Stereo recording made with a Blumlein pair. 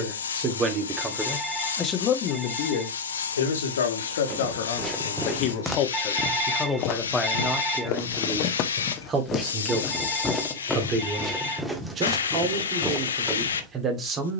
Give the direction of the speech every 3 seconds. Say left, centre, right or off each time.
centre, left, centre, right, right.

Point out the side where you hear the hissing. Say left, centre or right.
left.